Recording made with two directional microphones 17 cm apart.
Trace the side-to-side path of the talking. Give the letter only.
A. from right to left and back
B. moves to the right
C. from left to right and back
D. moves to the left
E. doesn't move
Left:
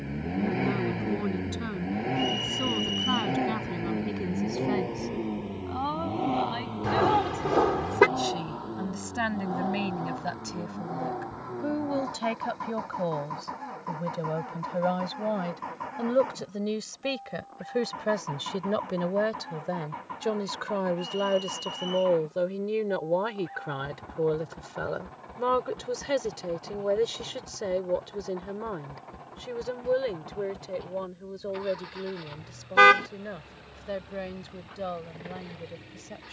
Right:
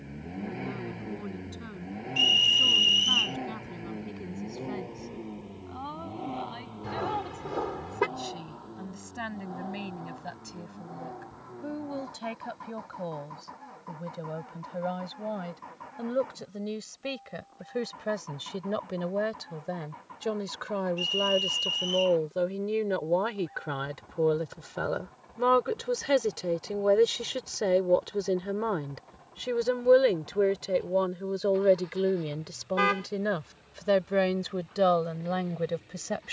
B.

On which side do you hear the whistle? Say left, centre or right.
right.